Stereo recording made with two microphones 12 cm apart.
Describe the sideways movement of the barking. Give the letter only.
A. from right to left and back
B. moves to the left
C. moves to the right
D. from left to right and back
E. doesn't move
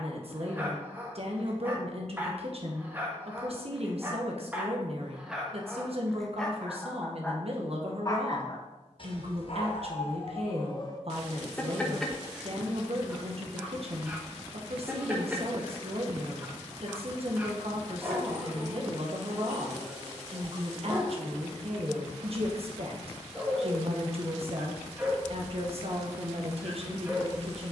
A.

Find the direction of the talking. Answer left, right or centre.
right.